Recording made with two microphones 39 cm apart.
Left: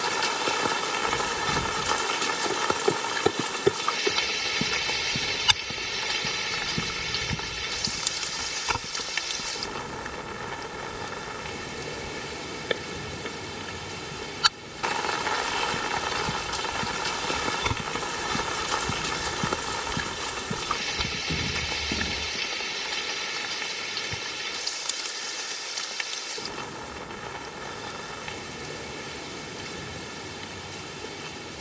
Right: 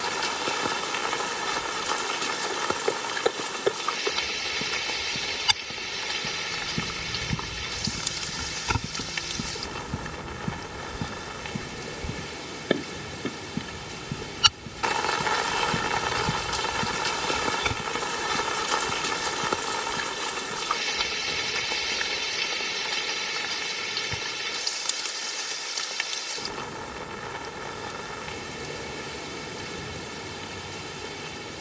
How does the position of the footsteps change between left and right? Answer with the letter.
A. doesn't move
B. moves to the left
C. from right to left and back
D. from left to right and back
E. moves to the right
D.